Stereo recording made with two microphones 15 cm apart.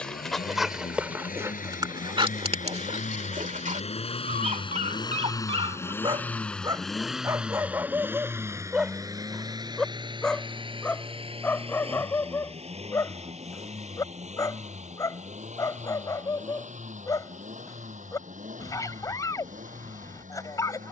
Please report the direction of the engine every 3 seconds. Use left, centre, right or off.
left, left, centre, right, right, right, right.